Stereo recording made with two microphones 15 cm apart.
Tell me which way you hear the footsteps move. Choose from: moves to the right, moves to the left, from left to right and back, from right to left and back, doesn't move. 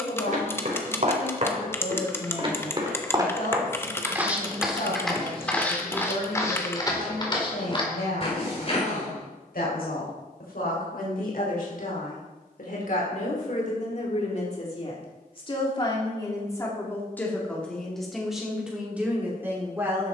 moves to the left.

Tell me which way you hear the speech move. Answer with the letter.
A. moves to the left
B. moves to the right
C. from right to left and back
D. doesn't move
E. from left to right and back
B.